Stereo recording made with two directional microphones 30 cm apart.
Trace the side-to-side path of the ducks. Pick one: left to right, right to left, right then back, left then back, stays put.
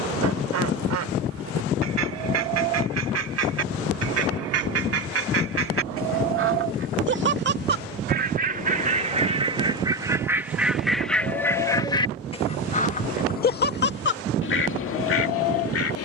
right to left.